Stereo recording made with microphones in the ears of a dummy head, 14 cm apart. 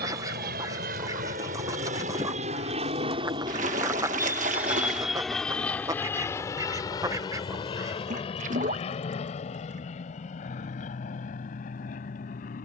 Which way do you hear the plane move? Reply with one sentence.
You can hear the plane go from the right side to the left.